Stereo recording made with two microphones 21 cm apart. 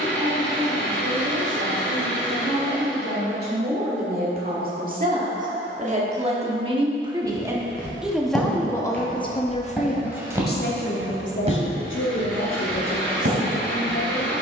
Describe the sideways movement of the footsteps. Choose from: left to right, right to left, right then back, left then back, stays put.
left to right.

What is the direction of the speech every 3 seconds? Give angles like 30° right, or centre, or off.
50° right, 40° right, 10° right, 50° left, 70° left.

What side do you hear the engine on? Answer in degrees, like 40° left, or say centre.
10° left.